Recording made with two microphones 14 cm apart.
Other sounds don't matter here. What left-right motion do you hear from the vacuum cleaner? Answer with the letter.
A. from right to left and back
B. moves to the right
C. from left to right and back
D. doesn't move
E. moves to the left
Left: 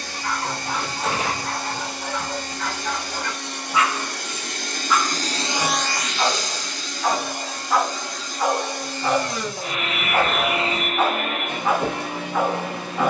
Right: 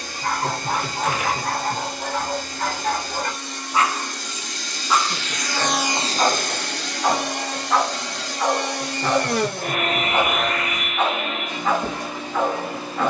C.